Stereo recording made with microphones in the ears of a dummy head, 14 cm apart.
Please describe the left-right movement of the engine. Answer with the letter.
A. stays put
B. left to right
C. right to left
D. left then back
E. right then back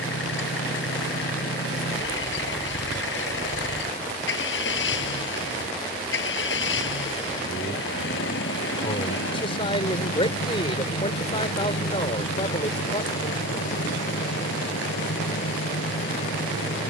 A.